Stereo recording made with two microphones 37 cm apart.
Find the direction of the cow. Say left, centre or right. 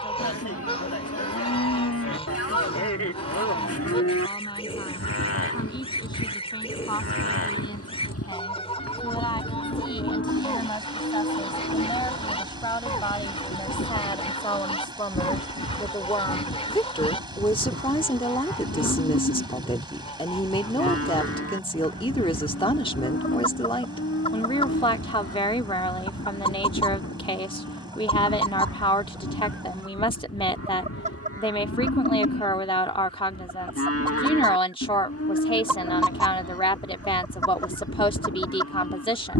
left.